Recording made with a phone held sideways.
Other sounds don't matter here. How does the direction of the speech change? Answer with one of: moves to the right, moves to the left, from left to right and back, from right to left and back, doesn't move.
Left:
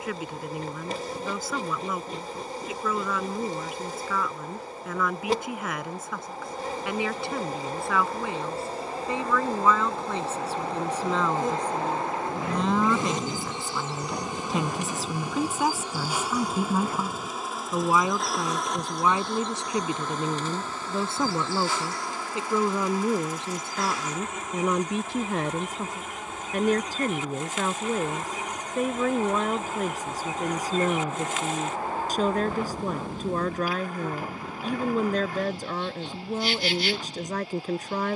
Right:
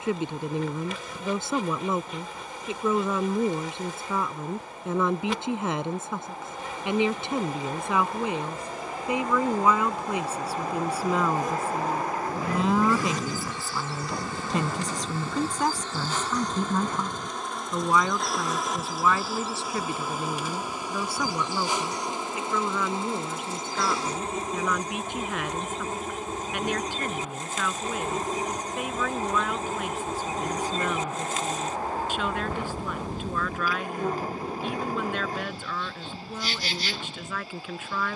moves to the left.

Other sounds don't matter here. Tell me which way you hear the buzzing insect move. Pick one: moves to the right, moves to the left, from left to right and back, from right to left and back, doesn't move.
moves to the right.